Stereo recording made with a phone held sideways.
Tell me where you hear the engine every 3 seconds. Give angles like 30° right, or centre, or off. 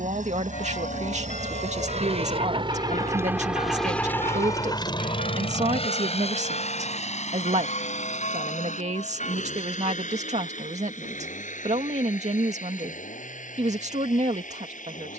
60° right, 20° left, 60° left, 70° left, 70° left.